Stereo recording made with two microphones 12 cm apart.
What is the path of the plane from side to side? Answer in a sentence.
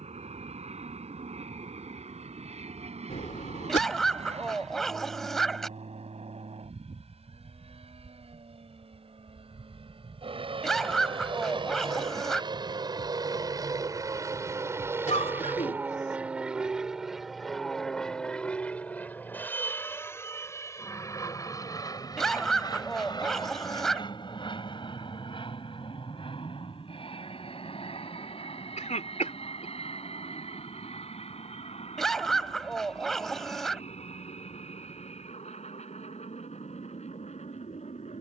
In this clip you hear the plane travel towards the left.